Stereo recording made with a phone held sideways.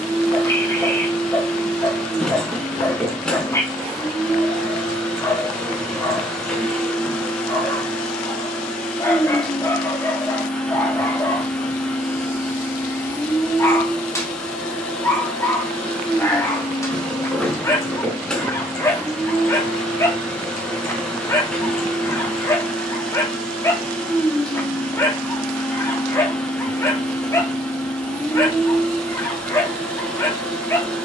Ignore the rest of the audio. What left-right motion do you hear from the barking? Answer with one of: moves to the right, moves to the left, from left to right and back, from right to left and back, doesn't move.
doesn't move.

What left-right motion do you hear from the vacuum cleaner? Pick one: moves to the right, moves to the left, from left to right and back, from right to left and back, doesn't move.
doesn't move.